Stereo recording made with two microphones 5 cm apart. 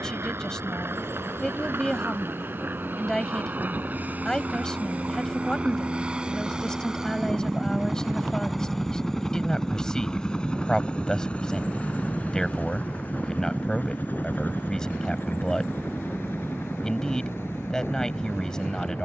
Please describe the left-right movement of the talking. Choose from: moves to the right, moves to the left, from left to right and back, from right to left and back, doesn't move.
doesn't move.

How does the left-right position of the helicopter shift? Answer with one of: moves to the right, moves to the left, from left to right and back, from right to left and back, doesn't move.
moves to the left.